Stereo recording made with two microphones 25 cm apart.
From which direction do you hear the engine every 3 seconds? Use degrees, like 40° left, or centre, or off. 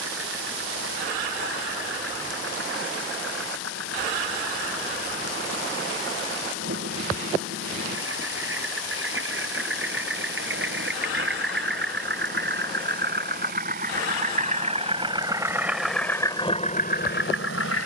60° right, 60° right, 50° right, 50° right, 40° right, 20° left.